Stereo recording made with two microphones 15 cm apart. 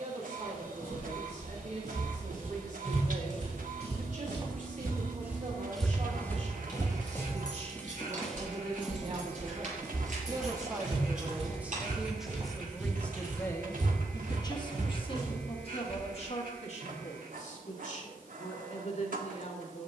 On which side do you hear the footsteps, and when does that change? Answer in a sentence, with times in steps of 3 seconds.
You can hear the footsteps on the right from 0 s, in the centre from 6 s, on the right from 9 s and not at all from 18 s.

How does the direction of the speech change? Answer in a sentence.
In this clip you hear the speech travel towards the left.